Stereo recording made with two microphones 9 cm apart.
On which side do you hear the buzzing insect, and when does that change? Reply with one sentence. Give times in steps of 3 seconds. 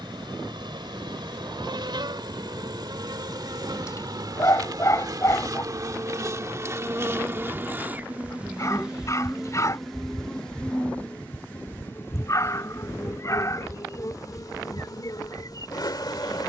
You can hear the buzzing insect on the right from 0 s, in the centre from 9 s and on the left from 12 s.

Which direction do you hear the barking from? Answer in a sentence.
In this clip you hear the barking on the left.